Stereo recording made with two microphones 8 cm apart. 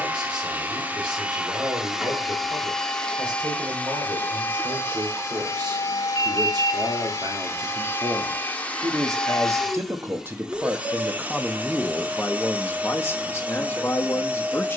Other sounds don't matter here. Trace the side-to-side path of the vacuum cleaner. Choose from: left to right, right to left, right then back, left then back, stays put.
left then back.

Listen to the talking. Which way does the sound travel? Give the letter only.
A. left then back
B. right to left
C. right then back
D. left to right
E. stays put
B.